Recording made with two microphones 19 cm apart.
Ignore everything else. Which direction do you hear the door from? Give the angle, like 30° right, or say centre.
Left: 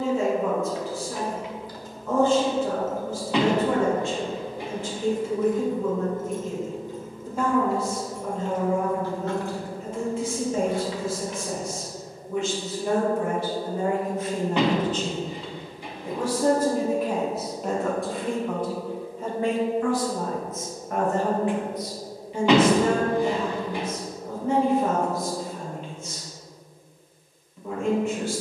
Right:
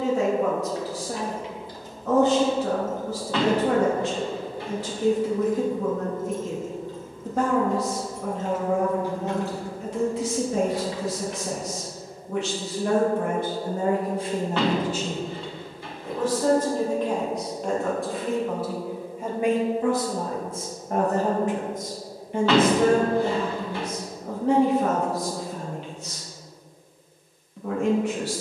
20° left.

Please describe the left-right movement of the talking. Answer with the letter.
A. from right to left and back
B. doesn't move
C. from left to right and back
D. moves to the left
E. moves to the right
A.